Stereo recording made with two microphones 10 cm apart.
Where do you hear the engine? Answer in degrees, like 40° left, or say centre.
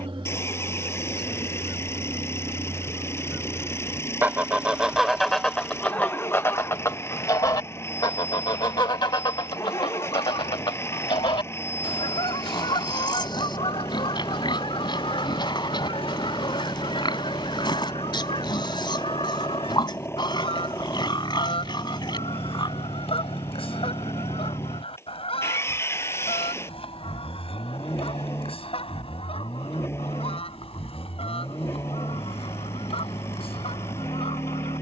20° left.